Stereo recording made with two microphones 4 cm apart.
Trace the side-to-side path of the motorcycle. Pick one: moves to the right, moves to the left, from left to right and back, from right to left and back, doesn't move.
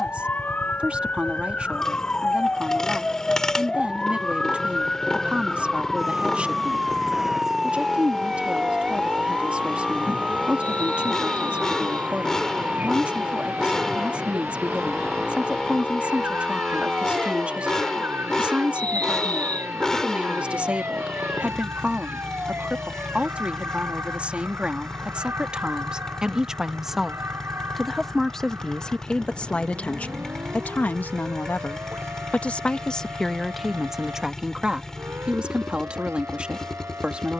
doesn't move.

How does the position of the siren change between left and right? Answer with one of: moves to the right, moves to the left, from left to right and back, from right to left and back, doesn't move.
moves to the right.